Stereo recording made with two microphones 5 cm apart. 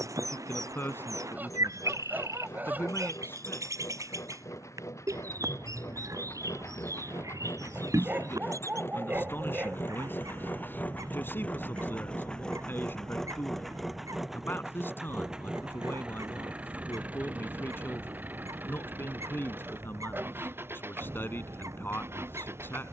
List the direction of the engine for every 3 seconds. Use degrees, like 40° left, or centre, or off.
80° left, 70° left, 60° left, 30° left, centre, 20° right, 40° right, 50° right.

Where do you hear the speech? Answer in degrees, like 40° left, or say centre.
40° left.